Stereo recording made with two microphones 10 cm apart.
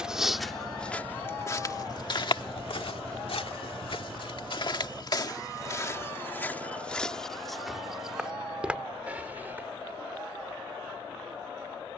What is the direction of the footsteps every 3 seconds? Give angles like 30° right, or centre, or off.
30° left, 50° left, 10° left, 20° right.